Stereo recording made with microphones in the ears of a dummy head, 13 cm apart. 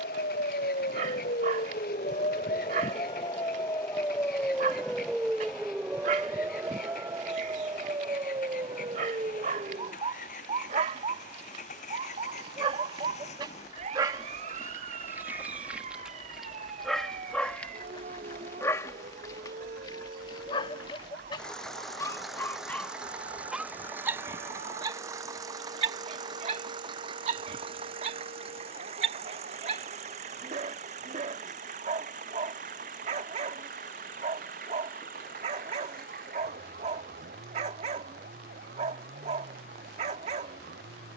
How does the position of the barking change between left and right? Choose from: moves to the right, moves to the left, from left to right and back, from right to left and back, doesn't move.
from right to left and back.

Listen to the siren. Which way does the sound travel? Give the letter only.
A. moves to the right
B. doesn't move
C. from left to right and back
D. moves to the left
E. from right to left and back
A.